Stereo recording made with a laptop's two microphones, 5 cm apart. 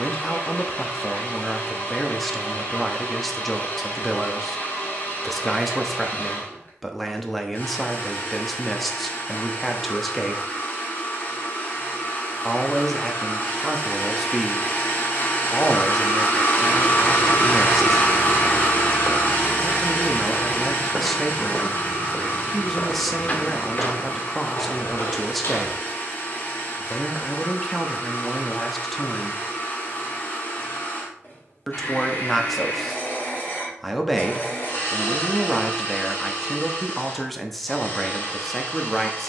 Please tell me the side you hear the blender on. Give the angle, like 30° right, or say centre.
50° left.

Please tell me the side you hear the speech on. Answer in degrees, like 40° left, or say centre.
centre.